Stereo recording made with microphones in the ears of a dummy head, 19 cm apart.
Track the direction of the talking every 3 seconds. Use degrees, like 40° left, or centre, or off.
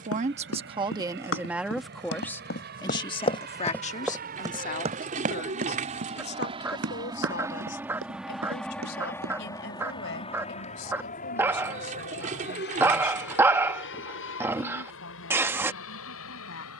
10° right, 40° left, 50° left, 60° left, 60° left, 70° left.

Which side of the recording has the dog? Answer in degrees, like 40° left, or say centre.
10° right.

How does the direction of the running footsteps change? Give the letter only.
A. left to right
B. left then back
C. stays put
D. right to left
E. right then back
A.